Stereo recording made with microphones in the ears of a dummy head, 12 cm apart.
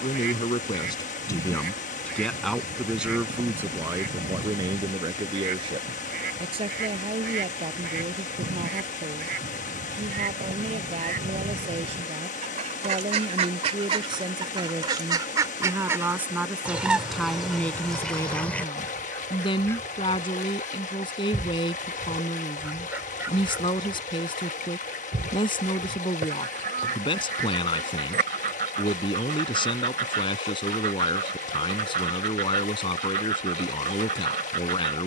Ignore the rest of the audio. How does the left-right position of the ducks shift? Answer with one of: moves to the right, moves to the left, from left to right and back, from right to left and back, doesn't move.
from right to left and back.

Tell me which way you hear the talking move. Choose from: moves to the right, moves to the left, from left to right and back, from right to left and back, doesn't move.
from left to right and back.